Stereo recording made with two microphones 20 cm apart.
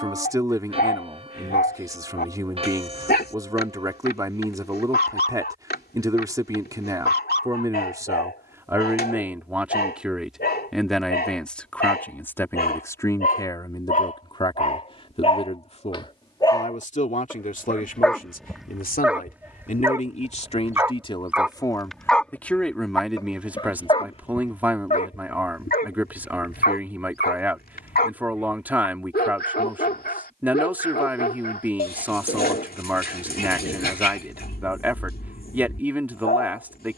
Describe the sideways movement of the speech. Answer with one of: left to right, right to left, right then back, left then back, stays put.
left then back.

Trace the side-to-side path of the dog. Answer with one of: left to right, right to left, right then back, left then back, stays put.
right then back.